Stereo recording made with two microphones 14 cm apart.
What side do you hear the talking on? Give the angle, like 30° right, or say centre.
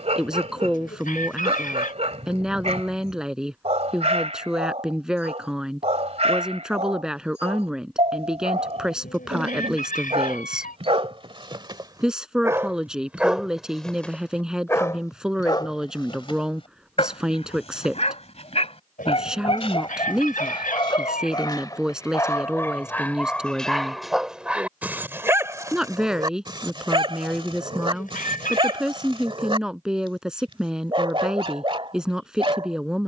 centre.